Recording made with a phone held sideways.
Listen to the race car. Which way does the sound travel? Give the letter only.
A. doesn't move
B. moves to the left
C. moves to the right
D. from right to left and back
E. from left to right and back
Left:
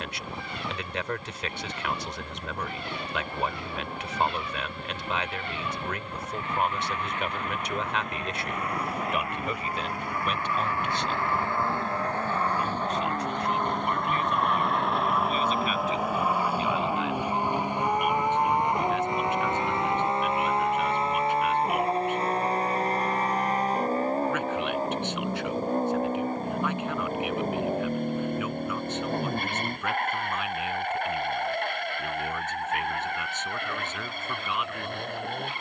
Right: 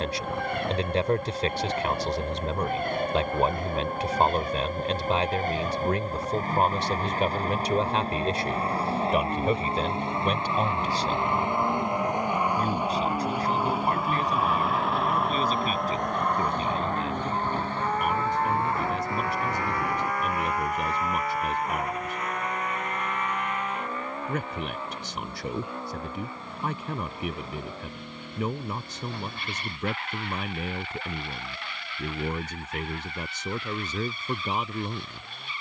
B.